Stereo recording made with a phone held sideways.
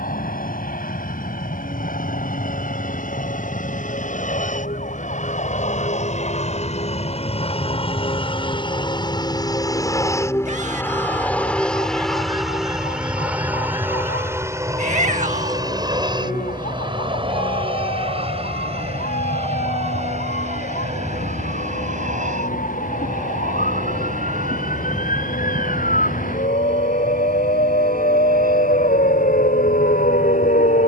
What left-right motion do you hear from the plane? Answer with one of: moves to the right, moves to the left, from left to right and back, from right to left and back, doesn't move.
moves to the right.